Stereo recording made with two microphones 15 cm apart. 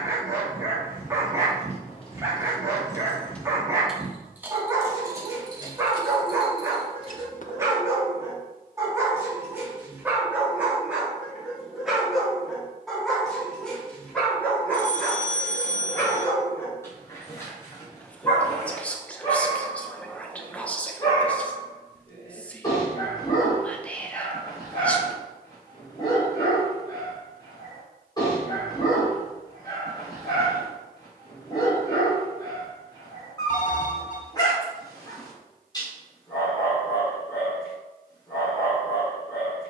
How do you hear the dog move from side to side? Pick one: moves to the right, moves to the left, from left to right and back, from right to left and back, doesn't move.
moves to the left.